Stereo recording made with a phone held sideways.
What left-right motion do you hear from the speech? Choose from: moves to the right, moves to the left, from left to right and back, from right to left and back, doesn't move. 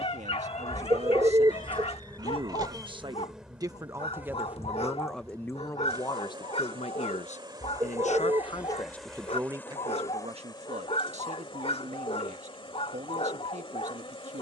from right to left and back.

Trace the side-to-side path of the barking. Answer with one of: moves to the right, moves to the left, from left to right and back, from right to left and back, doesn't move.
doesn't move.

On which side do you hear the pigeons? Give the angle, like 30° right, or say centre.
30° right.